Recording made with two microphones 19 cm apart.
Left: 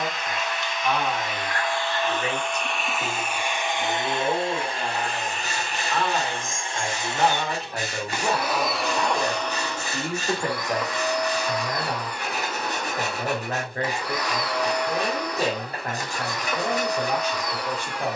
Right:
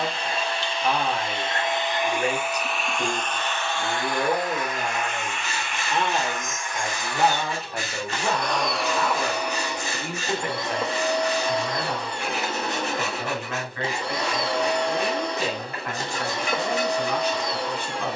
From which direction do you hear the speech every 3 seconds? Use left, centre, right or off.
right, right, centre, left, left, left.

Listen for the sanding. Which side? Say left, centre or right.
left.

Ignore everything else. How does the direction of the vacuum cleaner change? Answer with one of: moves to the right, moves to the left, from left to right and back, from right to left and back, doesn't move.
from right to left and back.